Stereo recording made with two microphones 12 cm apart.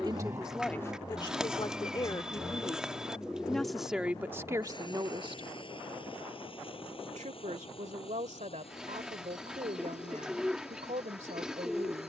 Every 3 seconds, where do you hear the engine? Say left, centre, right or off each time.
centre, left, left, left.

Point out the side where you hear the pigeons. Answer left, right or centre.
centre.